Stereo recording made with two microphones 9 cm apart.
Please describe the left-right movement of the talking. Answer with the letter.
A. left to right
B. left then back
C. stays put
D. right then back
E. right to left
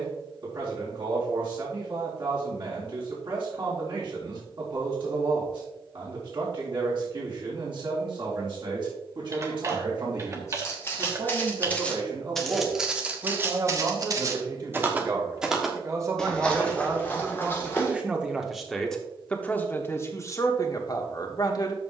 E.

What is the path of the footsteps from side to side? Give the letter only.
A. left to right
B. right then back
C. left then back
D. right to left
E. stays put
B.